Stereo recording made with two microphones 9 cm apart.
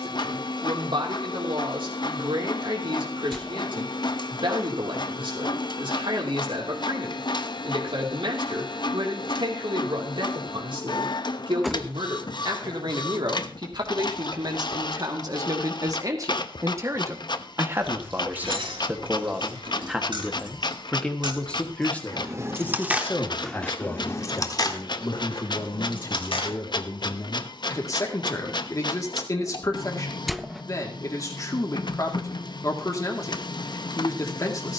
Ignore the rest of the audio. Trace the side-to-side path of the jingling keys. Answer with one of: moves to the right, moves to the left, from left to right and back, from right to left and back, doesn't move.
moves to the left.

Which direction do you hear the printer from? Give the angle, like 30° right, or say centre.
60° left.